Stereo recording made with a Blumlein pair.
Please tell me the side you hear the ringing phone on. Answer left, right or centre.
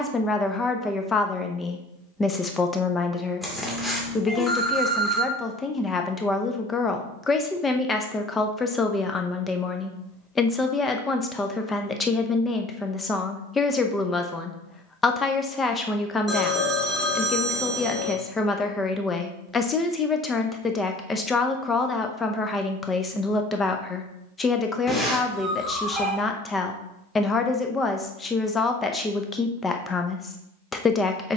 centre.